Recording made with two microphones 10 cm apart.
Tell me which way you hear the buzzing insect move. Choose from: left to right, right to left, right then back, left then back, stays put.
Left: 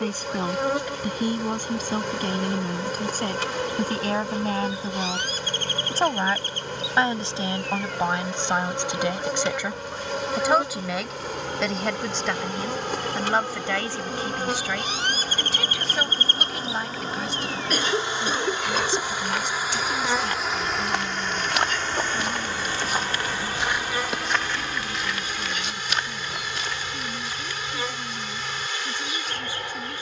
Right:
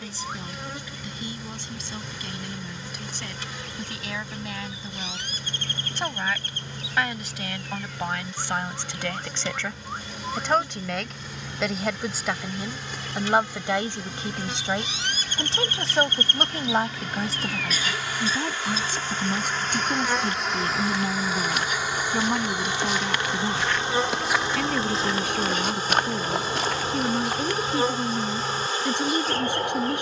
left to right.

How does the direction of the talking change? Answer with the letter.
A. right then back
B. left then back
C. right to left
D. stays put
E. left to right
E.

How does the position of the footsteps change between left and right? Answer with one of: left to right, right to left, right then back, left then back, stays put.
left to right.